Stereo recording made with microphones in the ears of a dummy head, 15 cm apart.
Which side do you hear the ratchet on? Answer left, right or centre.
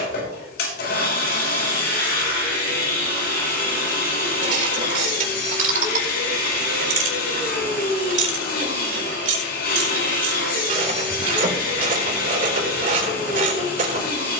right.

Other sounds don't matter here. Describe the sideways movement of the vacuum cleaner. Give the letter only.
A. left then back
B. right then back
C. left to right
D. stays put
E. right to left
D.